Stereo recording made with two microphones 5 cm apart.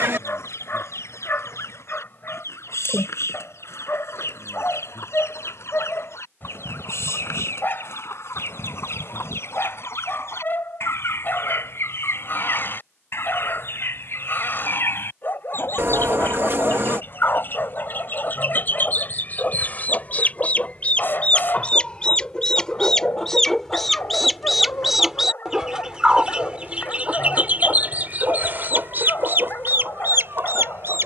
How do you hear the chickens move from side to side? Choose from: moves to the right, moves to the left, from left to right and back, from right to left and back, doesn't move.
moves to the right.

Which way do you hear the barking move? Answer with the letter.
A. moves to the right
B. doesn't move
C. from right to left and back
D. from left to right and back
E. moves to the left
B.